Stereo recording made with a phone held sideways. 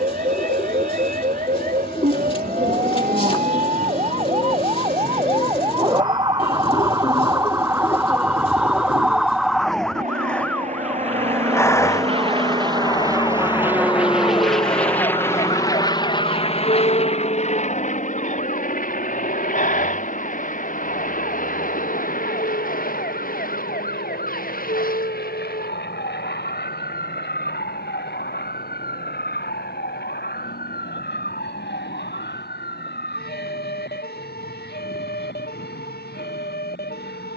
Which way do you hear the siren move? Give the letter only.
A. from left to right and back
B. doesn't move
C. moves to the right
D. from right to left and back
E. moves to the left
E.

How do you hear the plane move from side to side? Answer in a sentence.
You can hear the plane move to the left.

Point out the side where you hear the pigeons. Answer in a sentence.
In this clip you hear the pigeons on the left.